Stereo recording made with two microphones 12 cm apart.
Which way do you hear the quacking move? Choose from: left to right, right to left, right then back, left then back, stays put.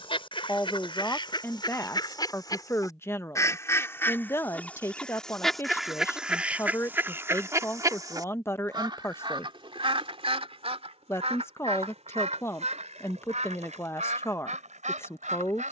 left to right.